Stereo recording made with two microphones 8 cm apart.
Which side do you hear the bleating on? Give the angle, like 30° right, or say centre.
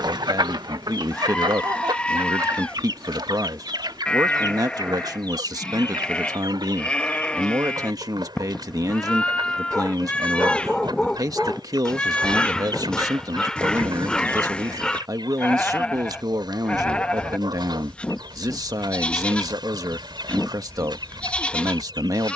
10° left.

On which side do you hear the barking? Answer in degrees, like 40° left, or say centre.
10° left.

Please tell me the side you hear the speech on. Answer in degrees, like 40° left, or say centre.
50° right.